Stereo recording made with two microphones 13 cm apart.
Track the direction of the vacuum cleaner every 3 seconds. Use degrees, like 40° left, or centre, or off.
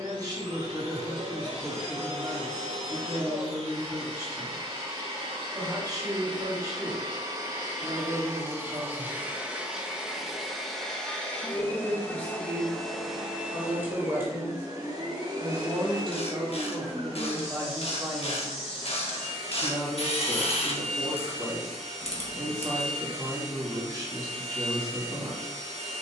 50° right, 50° right, 30° right, centre, 10° right, 40° right, 50° right, 50° right, 50° right.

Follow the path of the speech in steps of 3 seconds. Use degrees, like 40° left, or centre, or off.
30° right, 30° right, 30° right, 10° left, centre, 20° right, 20° right, 20° right, 20° right.